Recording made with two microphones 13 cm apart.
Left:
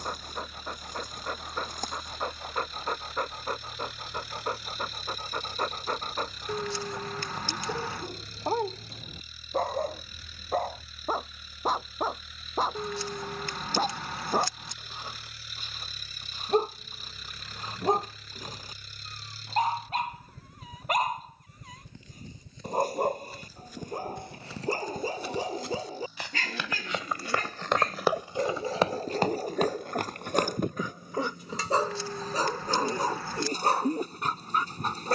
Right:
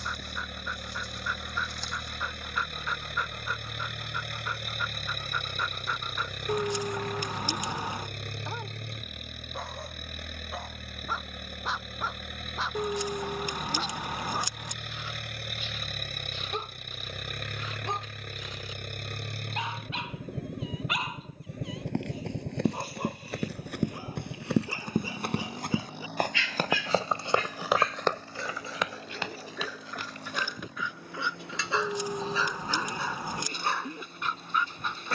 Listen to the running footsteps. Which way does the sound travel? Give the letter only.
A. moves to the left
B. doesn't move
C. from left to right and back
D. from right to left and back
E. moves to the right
A.